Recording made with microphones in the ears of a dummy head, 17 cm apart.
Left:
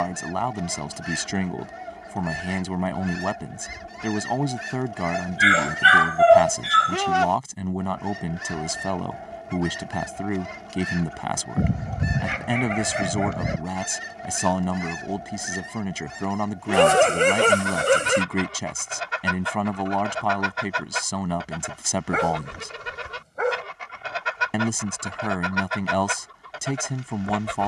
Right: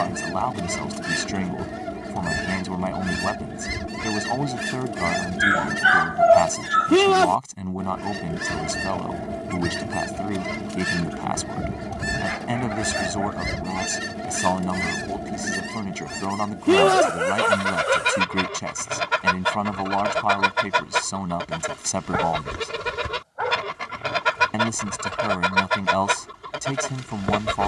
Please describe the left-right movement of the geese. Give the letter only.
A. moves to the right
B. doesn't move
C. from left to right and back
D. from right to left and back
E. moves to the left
B.